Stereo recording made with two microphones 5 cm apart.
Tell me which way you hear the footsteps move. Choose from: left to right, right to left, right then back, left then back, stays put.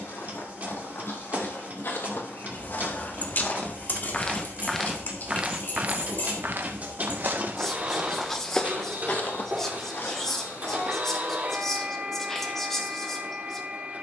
right then back.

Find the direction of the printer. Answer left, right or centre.
right.